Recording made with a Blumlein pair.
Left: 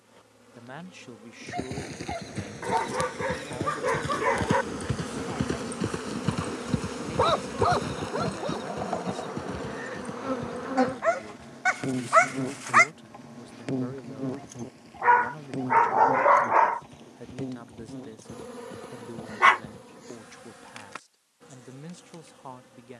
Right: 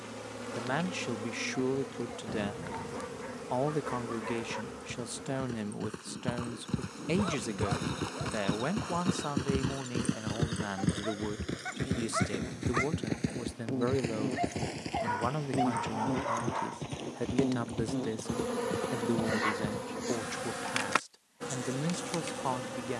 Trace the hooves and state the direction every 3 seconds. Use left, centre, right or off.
left, left, centre, right, right, right, right, off.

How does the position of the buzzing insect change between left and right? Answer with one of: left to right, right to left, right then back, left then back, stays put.
left then back.